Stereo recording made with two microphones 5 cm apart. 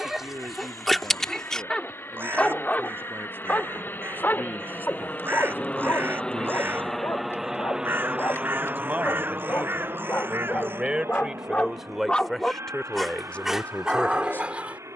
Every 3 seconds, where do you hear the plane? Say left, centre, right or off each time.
left, left, centre, right, right.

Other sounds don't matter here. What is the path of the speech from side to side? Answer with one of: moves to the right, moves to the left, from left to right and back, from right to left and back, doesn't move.
moves to the left.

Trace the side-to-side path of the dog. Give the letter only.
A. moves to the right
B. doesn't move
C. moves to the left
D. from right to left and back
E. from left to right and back
D.